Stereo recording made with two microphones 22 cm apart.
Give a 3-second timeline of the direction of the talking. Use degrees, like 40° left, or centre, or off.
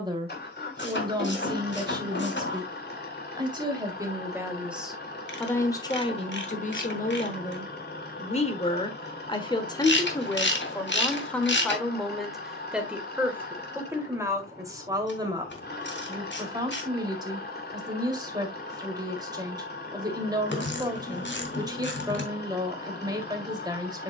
20° right, 10° right, 30° left, 10° left, 10° right, 20° right, 20° right, 20° right.